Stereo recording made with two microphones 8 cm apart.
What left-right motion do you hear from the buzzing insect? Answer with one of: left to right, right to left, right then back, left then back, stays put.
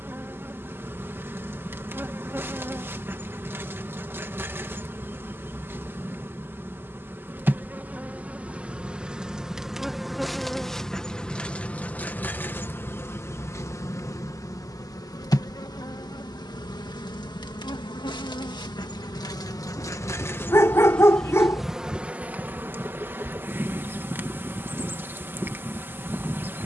left then back.